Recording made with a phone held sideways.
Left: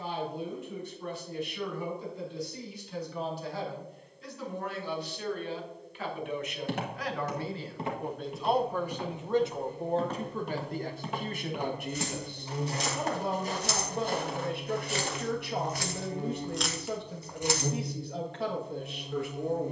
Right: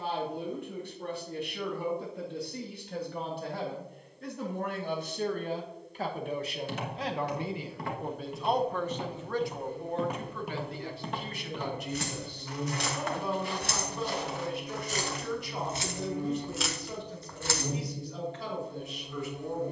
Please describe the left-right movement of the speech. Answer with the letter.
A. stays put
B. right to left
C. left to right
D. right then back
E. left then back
B.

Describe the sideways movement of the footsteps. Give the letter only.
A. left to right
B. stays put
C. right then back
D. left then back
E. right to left
C.